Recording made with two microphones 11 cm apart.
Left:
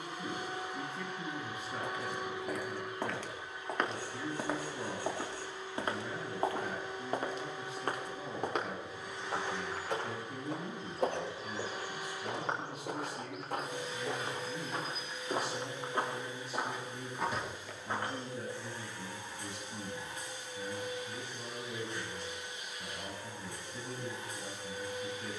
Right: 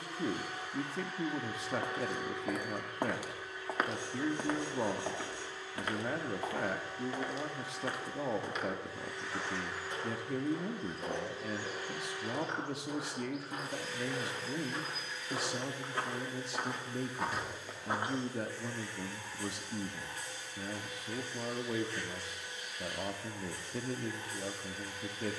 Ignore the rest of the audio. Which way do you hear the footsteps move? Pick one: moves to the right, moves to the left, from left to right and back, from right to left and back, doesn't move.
from right to left and back.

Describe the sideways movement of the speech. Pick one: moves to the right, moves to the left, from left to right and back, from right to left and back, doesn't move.
doesn't move.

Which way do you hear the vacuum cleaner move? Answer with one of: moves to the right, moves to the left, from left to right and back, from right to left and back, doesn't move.
doesn't move.